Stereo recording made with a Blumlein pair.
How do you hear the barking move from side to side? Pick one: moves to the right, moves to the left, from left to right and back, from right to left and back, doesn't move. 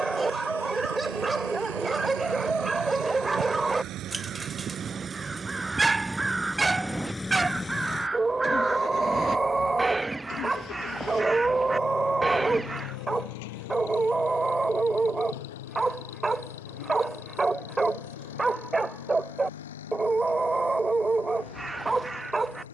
doesn't move.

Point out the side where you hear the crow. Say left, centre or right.
centre.